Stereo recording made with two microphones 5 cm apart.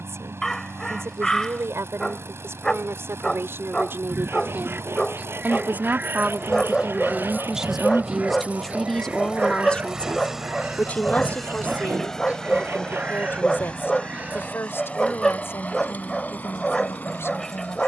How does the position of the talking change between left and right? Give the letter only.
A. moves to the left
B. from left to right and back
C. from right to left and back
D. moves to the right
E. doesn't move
A.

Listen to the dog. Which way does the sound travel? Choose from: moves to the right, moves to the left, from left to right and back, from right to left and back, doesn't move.
doesn't move.